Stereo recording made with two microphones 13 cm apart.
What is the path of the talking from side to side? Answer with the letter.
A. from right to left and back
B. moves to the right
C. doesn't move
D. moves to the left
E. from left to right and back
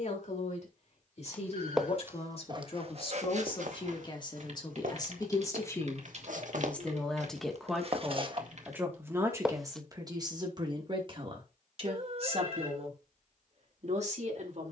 B.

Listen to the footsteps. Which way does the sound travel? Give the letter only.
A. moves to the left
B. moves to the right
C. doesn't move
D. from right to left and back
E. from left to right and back
E.